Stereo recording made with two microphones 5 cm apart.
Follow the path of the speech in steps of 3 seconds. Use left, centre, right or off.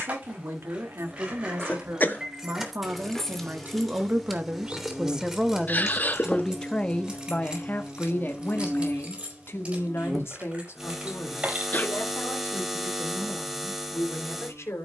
right, right, left, left, left.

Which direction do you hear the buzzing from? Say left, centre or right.
centre.